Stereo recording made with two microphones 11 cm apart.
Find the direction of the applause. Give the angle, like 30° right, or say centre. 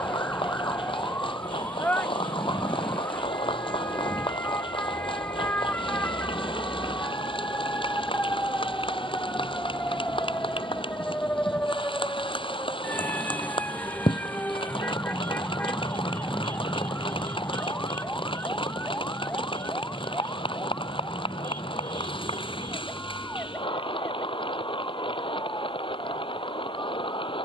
50° left.